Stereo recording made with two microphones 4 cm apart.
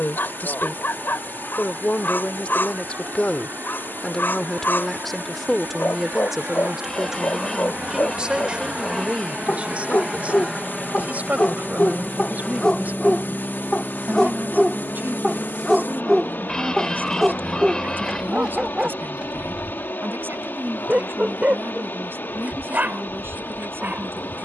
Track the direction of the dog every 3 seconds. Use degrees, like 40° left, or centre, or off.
60° left, 60° left, 50° left, 40° left, 20° left, 10° right, 20° right, 40° right.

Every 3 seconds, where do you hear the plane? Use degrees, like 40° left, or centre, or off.
60° right, 50° right, 40° right, 10° right, 20° left, 40° left, 50° left, 60° left.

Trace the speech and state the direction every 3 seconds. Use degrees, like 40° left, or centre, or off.
40° left, 10° left, 20° right, 40° right, 50° right, 50° right, 60° right, 60° right.